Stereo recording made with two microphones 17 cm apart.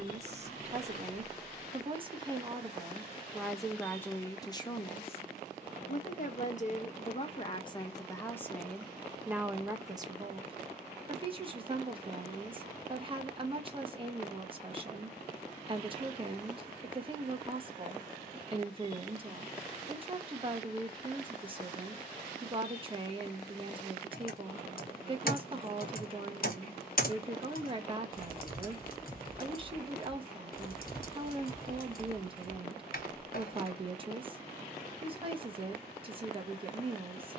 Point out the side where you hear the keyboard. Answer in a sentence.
In this clip you hear the keyboard on the left.